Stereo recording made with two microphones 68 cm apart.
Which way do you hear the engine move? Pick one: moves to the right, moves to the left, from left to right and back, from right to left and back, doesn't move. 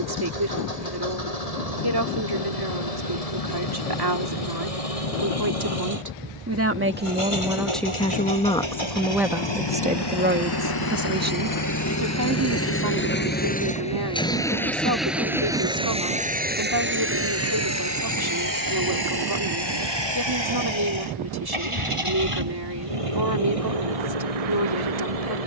moves to the right.